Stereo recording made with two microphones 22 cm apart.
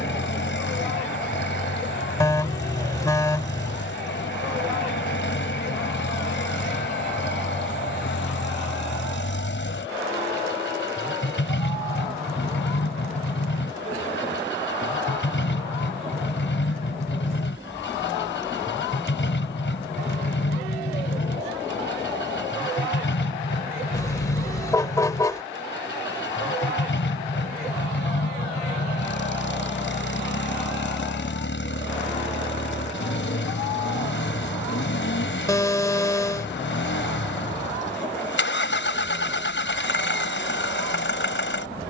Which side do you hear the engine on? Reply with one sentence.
You can hear the engine on the left.